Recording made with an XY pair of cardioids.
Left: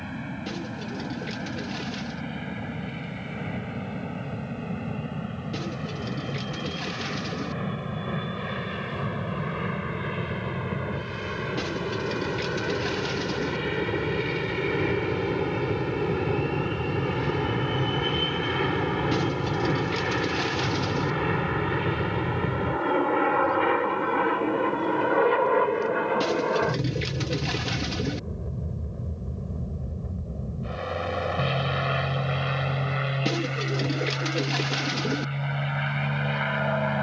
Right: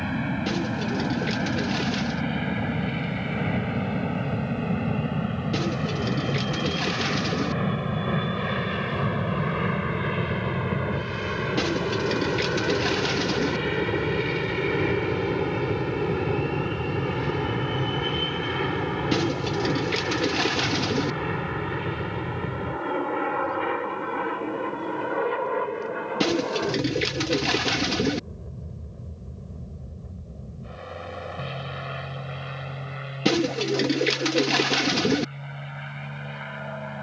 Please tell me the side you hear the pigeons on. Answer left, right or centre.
right.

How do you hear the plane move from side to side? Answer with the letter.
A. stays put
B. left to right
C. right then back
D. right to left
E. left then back
D.